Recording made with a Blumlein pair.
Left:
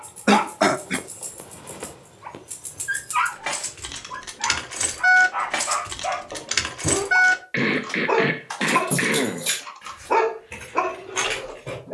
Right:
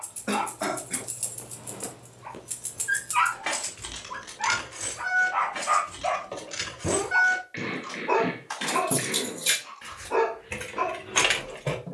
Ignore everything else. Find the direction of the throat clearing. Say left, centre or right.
left.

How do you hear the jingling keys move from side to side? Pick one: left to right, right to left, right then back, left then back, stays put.
left then back.